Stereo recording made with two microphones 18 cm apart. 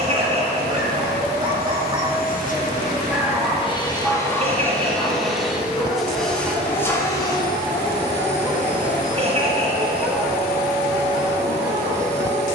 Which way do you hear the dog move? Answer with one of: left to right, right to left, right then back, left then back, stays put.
left then back.